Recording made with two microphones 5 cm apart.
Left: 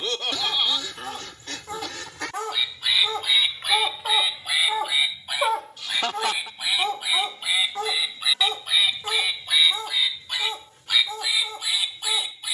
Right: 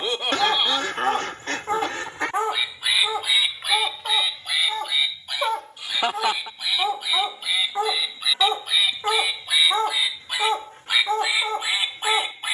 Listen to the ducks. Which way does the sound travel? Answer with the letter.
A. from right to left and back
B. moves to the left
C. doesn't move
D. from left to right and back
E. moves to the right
A.